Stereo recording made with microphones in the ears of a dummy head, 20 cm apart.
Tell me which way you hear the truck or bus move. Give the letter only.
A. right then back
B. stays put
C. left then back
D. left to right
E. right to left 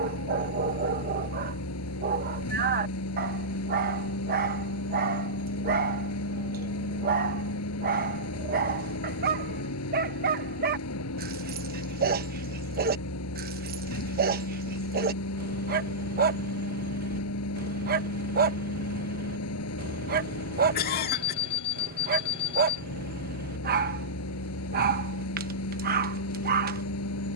B.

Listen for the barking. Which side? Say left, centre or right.
right.